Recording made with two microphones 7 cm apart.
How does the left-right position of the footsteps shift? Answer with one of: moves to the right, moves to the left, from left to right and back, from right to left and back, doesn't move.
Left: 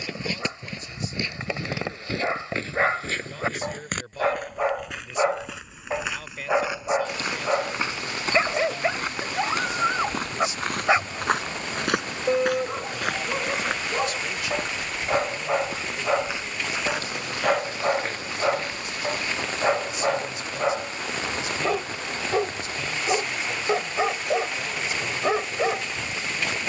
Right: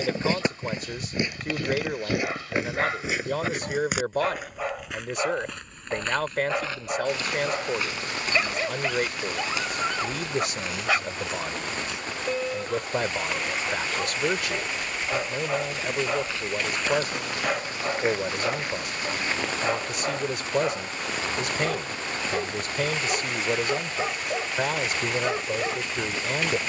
from right to left and back.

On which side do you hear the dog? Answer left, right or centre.
left.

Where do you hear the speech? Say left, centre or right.
right.